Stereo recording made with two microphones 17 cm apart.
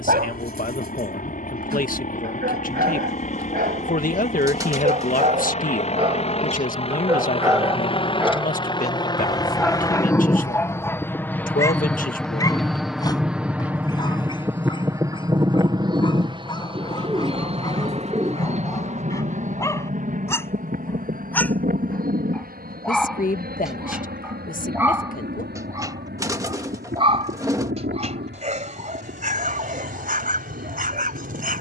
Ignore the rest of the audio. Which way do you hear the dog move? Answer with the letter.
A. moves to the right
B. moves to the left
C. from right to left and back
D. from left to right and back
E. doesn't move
C.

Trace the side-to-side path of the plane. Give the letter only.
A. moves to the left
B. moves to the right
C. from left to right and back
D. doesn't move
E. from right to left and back
B.